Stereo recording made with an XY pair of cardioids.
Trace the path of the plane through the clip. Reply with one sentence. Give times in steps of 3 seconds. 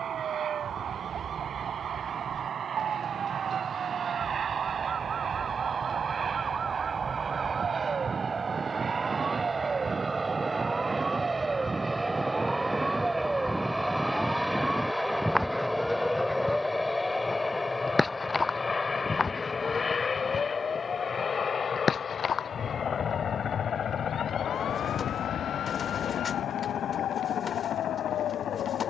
In this clip you hear the plane on the right from 0 s, in the centre from 12 s and on the left from 18 s.